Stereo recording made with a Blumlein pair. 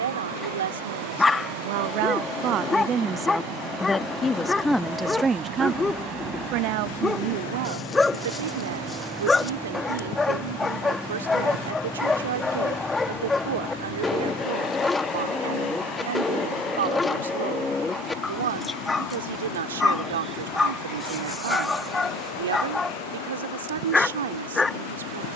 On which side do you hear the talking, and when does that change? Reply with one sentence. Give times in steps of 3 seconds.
You can hear the talking on the right from 0 s, in the centre from 3 s and on the right from 6 s.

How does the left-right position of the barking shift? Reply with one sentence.
In this clip you hear the barking stay put.